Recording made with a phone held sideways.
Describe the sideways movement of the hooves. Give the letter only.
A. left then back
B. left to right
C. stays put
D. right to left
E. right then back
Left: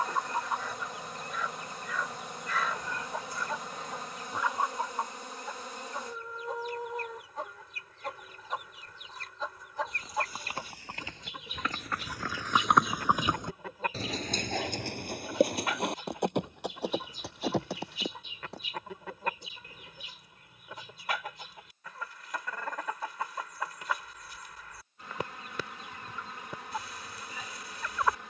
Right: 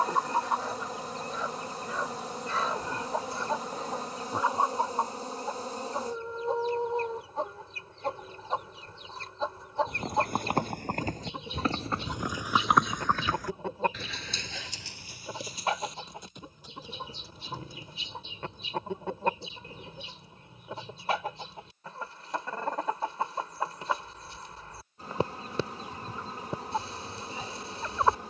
D.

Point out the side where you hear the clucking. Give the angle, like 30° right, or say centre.
30° right.